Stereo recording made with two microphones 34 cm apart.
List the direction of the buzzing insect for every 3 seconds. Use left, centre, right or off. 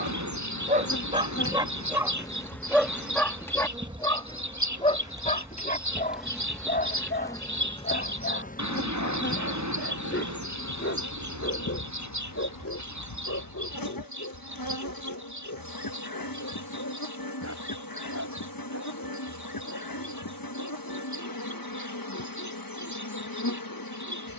left, centre, centre, left, left, left, left, left.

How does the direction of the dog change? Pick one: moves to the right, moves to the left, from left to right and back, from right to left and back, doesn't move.
moves to the left.